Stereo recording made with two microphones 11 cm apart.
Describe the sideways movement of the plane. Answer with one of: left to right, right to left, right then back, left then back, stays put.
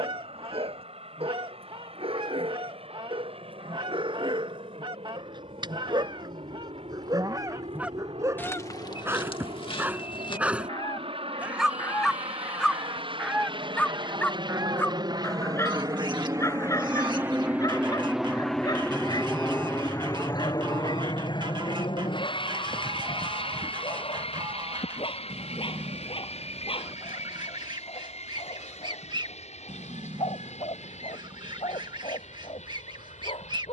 right to left.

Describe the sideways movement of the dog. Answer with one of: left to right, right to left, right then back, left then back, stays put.
right to left.